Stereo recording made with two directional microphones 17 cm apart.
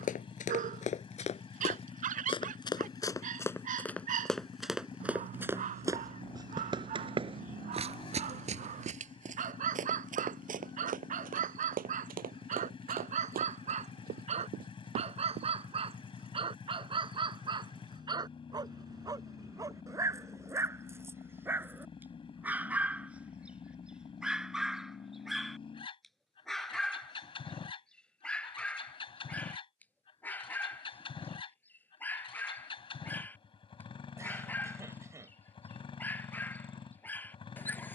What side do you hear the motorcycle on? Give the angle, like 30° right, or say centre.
30° left.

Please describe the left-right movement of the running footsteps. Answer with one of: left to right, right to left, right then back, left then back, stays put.
left to right.